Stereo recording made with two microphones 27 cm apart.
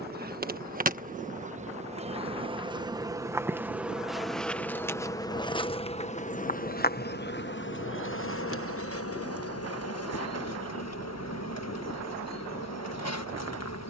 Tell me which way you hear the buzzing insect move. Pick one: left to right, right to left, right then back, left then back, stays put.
right to left.